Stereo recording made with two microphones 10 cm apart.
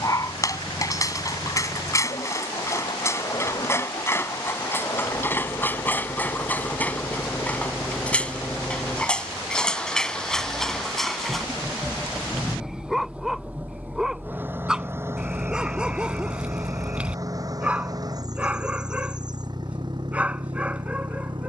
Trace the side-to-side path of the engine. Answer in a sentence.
You can hear the engine travel towards the right.